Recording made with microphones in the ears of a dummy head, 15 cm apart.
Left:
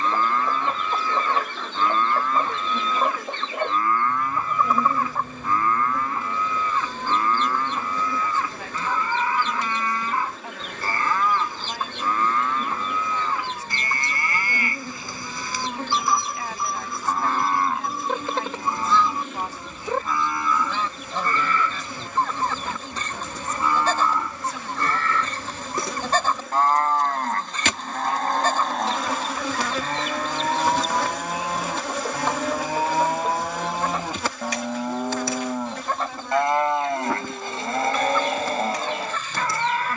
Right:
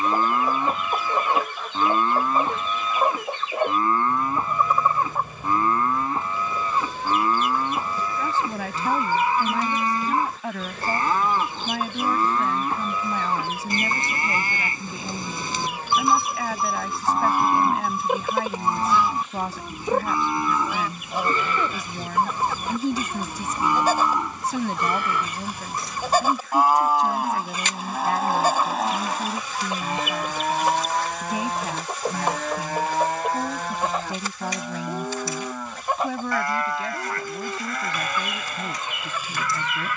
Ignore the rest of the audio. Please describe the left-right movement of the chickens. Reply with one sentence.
You can hear the chickens stay put.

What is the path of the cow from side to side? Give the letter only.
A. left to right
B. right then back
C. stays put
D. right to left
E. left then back
D.